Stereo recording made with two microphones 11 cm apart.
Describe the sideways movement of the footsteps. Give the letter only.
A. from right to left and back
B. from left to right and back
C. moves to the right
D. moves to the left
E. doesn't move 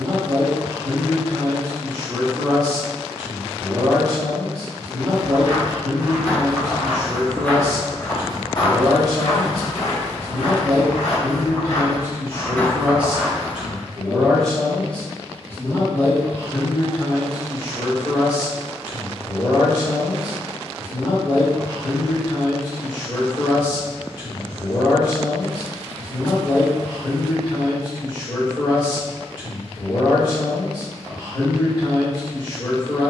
A.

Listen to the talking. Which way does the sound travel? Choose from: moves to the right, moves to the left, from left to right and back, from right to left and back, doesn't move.
moves to the left.